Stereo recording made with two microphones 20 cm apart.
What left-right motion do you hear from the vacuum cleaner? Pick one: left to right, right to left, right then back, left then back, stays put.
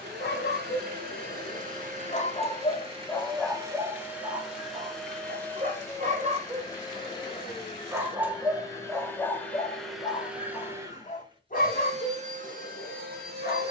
left then back.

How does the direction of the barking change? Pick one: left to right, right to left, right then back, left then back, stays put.
right then back.